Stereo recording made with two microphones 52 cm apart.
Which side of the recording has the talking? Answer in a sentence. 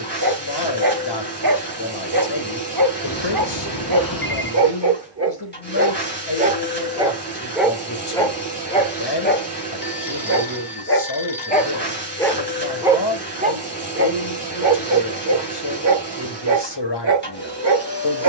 You can hear the talking on the left.